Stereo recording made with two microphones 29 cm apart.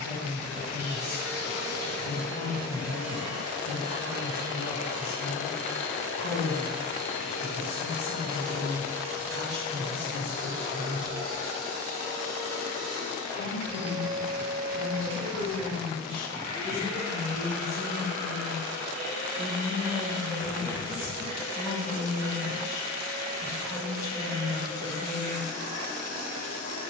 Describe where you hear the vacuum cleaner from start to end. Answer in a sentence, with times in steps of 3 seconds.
You can hear the vacuum cleaner on the right from 0 s, in the centre from 3 s and on the right from 9 s.